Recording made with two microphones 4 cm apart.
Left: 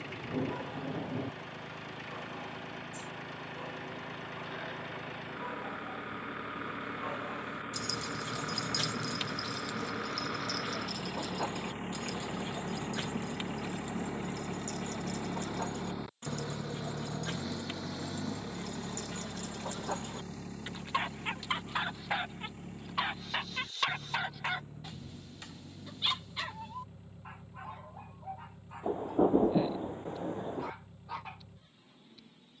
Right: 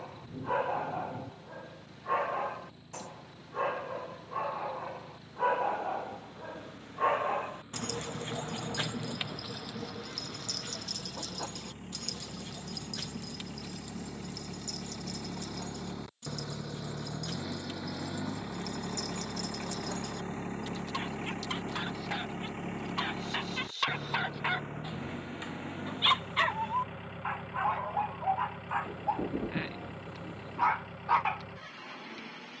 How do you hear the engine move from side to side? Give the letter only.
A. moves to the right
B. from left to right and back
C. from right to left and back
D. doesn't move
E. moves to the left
A.